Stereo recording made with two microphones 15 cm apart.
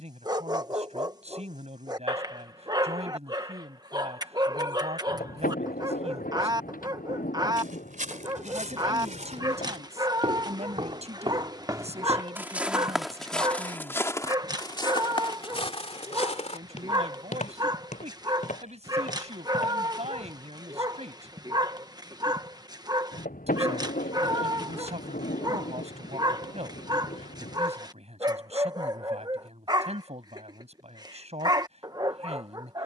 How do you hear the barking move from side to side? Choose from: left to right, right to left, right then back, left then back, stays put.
stays put.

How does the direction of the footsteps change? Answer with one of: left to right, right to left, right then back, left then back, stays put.
right to left.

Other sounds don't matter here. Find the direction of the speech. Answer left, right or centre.
right.